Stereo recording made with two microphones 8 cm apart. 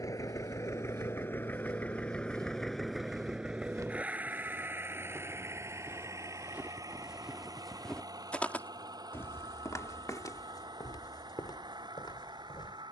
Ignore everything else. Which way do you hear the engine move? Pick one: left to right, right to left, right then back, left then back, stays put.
left to right.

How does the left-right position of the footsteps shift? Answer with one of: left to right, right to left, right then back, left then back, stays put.
right to left.